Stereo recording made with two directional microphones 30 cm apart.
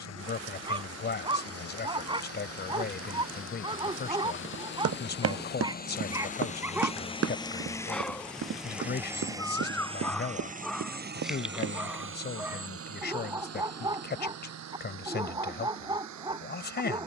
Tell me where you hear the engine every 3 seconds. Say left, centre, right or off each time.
left, left, centre, right, right, right.